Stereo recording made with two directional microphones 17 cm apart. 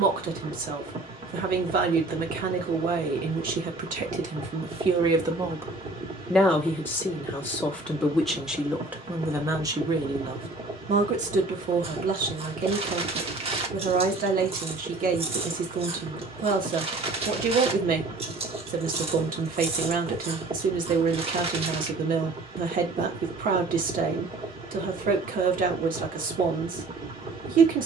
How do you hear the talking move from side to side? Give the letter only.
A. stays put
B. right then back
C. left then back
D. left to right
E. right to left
C.